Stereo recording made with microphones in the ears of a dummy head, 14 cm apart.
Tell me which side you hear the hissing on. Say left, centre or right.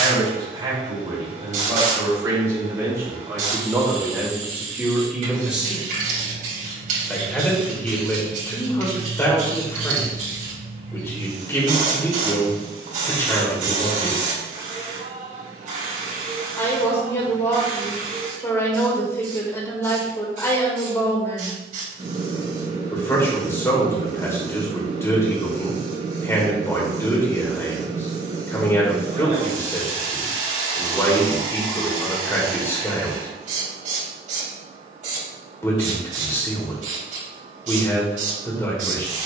right.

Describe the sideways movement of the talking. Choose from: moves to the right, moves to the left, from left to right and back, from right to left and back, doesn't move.
moves to the left.